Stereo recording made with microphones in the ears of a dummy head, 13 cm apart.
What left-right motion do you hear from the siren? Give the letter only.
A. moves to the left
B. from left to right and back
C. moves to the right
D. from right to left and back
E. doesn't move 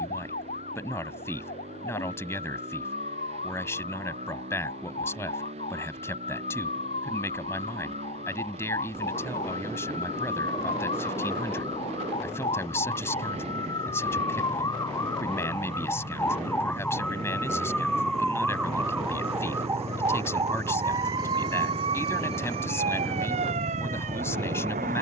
C.